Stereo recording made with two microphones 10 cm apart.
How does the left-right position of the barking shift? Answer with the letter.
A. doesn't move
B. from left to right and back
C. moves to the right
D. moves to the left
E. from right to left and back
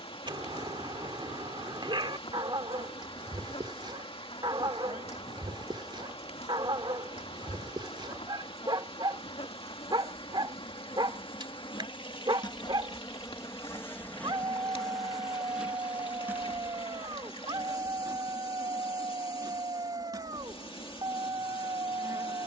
A.